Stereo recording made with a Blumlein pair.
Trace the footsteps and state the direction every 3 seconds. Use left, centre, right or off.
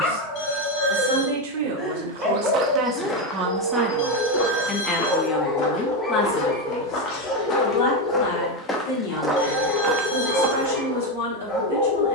right, left, left, right.